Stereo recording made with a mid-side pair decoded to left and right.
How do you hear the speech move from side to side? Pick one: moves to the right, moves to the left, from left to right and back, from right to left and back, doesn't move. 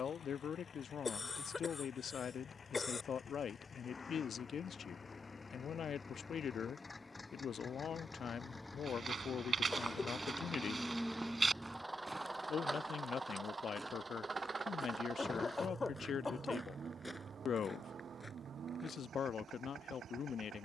doesn't move.